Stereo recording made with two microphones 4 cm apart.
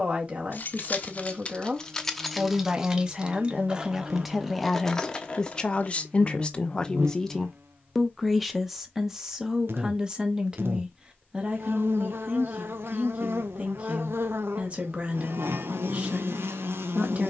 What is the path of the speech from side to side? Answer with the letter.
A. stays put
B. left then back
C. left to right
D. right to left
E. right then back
B.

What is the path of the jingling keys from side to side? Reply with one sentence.
In this clip you hear the jingling keys move from left to right and back again.